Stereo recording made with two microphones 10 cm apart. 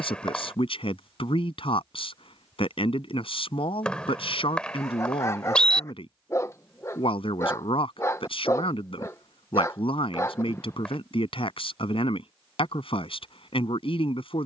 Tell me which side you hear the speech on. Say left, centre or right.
left.